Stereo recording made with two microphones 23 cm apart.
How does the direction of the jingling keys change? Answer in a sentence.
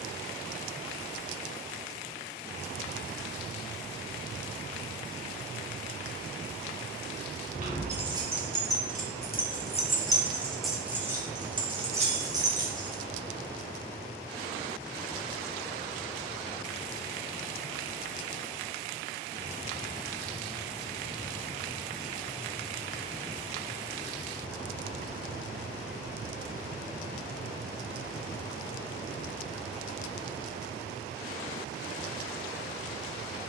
In this clip you hear the jingling keys move from right to left and back again.